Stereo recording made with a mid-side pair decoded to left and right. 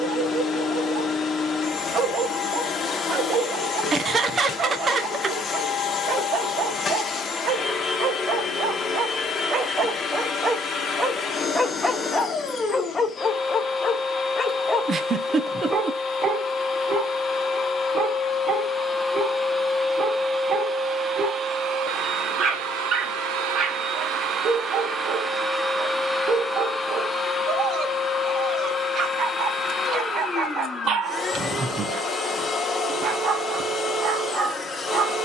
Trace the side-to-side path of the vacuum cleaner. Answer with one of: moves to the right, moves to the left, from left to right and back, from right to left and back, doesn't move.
from left to right and back.